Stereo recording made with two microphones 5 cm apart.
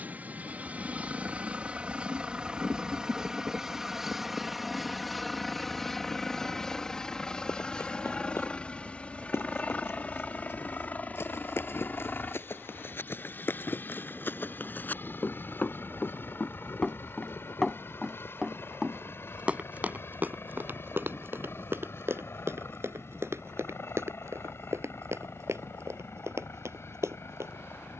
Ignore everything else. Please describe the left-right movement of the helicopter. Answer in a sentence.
You can hear the helicopter travel towards the left.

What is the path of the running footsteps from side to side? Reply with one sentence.
In this clip you hear the running footsteps move from left to right.